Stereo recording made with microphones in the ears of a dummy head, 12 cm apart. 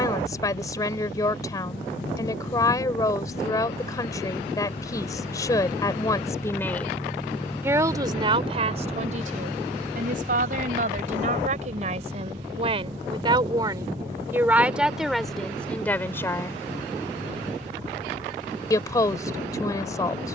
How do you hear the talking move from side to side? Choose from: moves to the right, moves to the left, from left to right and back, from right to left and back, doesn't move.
from left to right and back.